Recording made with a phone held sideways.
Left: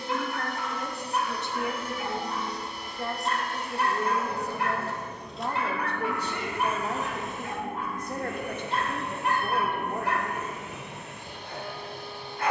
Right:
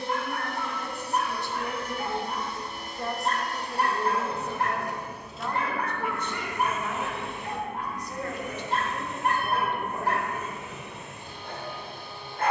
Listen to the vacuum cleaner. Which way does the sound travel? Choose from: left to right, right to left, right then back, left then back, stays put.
right to left.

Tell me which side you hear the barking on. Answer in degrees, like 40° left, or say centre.
50° right.